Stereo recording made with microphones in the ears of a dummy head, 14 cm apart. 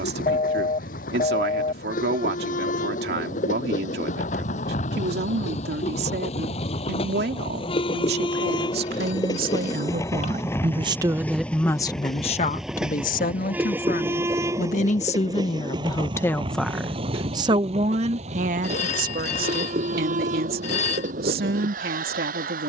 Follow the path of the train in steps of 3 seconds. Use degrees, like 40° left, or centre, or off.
60° left, 50° left, 40° left, 20° left, 10° right, 30° right, 50° right, 60° right.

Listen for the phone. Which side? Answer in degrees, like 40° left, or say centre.
50° left.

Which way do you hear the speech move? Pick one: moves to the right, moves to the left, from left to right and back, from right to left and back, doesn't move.
from right to left and back.